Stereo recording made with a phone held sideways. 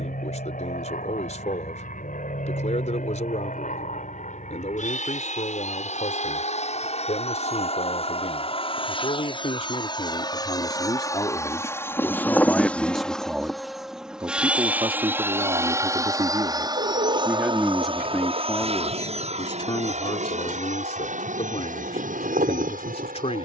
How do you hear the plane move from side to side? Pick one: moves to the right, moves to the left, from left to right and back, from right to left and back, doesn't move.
moves to the right.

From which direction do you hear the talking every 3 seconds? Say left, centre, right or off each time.
left, left, left, left, centre, right, left, left.